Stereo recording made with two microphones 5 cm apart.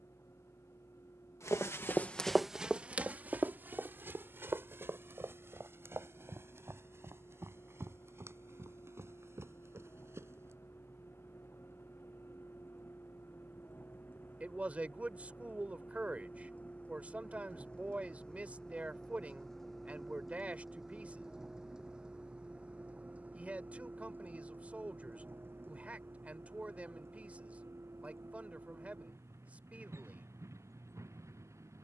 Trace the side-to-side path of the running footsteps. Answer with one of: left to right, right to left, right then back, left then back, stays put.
left to right.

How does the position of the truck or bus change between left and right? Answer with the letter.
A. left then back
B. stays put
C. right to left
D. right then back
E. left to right
E.